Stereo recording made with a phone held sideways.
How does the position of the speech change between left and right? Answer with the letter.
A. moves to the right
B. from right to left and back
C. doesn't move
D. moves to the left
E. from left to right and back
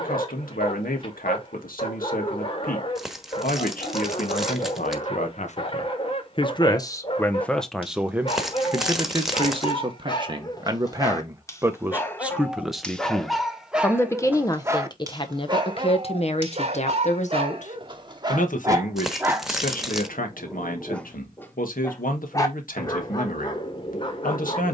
E.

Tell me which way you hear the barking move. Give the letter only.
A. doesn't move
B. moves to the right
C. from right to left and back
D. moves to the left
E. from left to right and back
E.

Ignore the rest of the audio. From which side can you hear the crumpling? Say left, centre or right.
centre.